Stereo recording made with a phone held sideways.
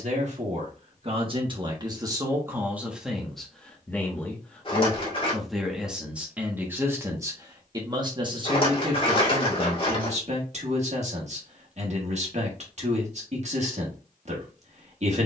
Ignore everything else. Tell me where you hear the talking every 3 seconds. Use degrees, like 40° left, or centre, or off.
30° right, centre, 20° right, 50° right, 50° right.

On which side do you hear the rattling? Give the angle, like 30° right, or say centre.
40° left.